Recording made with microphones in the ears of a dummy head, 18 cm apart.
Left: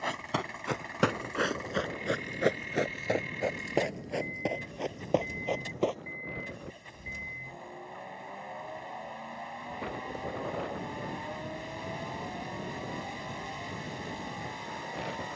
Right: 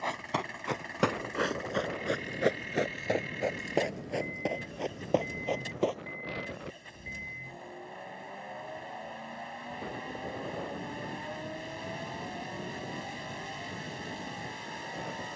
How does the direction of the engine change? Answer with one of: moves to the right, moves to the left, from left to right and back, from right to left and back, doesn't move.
doesn't move.